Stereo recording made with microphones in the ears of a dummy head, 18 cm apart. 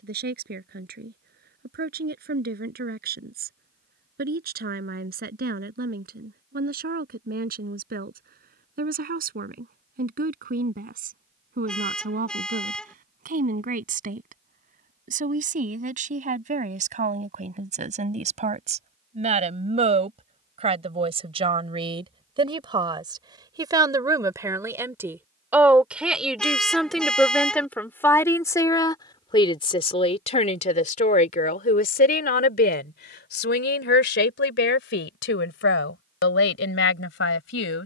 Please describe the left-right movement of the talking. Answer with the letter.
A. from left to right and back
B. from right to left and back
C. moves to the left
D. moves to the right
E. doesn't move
C.